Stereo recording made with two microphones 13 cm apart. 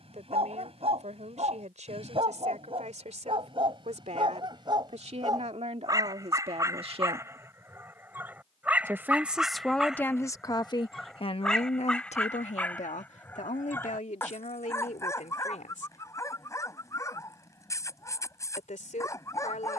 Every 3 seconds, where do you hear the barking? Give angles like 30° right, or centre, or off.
50° right, 40° right, 20° right, centre, 20° left, 20° left, 30° left.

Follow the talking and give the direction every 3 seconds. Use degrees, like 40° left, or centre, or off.
70° right, 60° right, 50° right, 30° left, 70° left, 80° left, 80° left.